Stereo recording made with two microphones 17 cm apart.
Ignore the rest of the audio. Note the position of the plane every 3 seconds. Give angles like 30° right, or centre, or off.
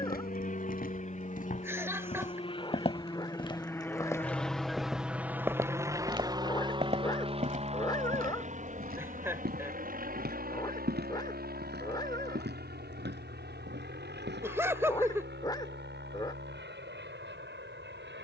40° left, centre, 30° right, 50° right, 60° right, 60° right.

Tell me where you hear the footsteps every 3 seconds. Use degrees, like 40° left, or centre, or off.
50° left, 10° left, 50° right, 70° right, 80° right, off.